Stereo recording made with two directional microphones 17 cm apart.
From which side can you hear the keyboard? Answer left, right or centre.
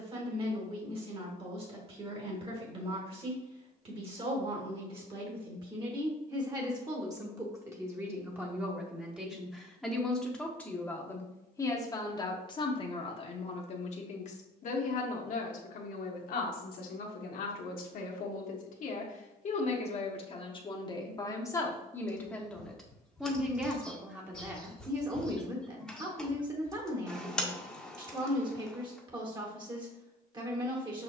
centre.